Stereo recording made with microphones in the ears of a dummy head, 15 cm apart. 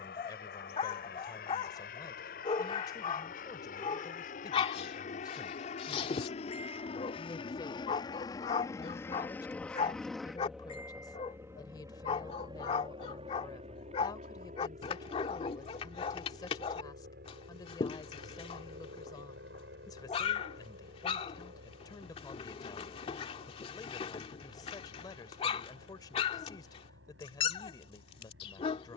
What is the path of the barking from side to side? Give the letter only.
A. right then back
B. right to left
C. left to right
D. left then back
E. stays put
E.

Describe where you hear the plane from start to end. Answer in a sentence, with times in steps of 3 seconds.
In this clip you hear the plane on the left from 0 s, in the centre from 9 s and on the right from 12 s.